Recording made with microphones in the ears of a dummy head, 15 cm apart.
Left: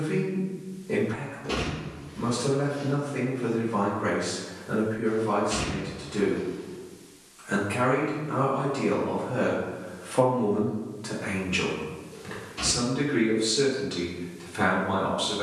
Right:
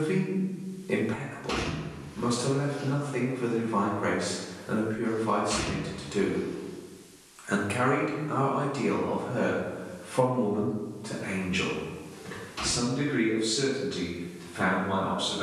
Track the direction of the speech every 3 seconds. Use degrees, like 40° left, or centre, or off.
60° right, 60° right, 30° right, 30° left, 40° left.